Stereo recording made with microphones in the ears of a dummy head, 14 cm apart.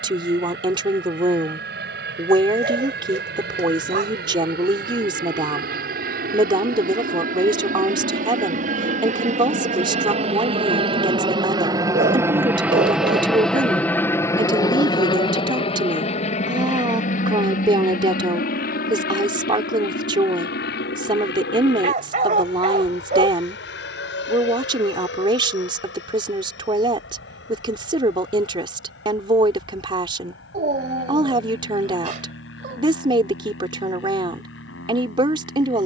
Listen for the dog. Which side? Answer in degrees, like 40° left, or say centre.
50° right.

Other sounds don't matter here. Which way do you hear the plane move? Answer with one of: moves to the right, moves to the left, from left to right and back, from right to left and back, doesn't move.
moves to the left.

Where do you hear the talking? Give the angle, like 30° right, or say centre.
30° right.